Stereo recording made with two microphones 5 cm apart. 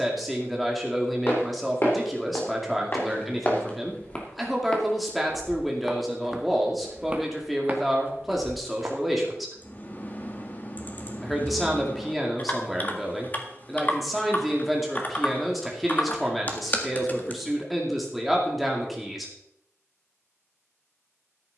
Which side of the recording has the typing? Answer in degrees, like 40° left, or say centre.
30° left.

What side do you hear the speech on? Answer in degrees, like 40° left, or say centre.
centre.